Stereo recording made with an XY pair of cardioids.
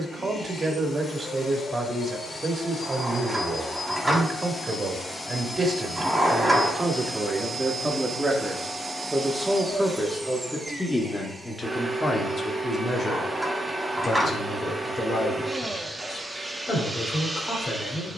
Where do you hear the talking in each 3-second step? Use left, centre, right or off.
right, right, right, centre, left, left.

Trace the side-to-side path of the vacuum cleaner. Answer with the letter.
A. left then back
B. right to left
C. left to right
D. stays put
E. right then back
C.